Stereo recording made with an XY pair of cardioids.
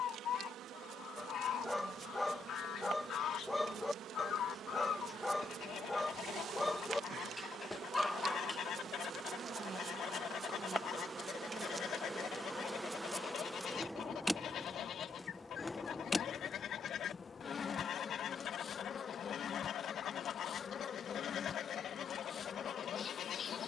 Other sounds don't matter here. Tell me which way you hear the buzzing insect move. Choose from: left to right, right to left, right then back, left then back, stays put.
right to left.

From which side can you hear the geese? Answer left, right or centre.
left.